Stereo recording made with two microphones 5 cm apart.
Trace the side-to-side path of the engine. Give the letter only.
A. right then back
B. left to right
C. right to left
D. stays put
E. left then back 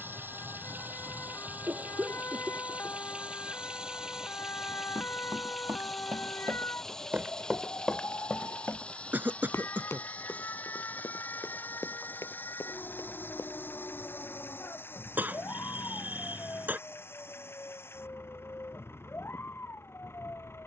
C.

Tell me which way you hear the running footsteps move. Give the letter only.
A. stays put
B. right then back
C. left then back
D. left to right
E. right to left
E.